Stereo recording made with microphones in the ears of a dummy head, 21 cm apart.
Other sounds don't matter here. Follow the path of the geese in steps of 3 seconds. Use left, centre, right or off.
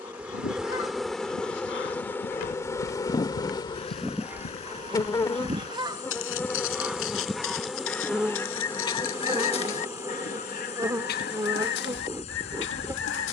left, centre, centre, left, left.